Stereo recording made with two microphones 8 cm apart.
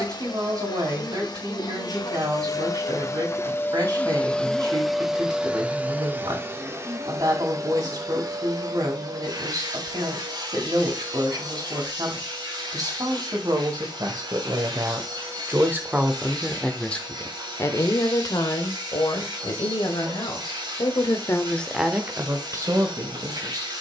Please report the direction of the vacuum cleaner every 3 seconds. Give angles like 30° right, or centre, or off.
50° left, 10° left, 40° right, 60° right, 60° right, 60° right, 60° right, 60° right.